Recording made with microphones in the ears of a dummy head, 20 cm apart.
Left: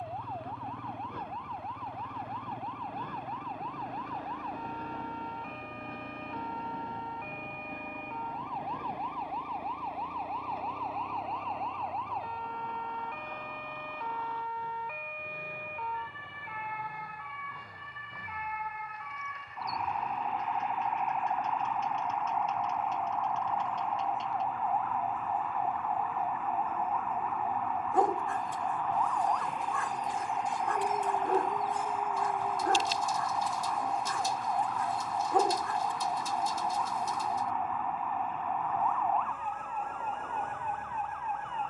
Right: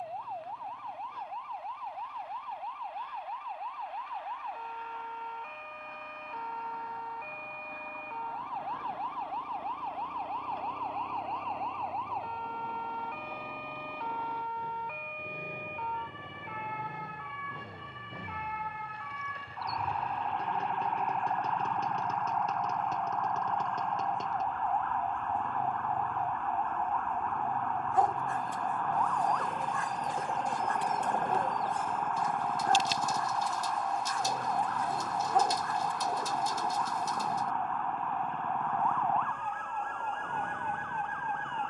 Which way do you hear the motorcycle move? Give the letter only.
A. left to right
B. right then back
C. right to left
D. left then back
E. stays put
A.